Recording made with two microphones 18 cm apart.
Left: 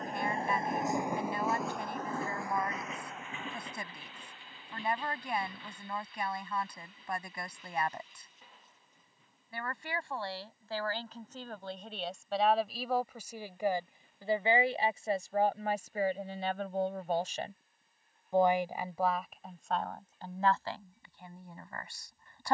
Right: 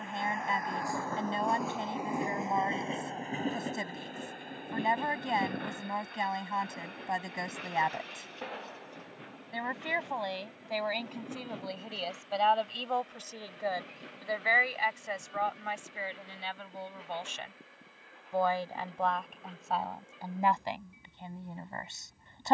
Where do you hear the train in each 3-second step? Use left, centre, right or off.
centre, right, right, right, right, right, right, right.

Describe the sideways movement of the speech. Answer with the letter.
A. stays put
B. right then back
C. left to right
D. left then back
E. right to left
D.